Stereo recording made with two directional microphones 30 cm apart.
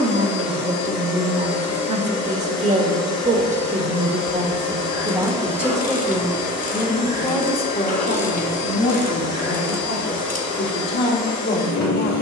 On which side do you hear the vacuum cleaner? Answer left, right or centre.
left.